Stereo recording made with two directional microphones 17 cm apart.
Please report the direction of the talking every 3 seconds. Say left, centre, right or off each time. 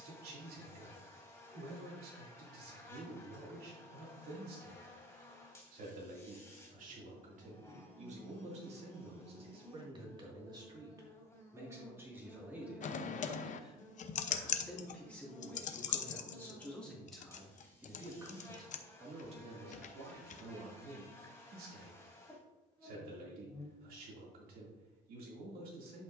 right, right, right, right, centre, centre, right, right, right.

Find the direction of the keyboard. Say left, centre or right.
left.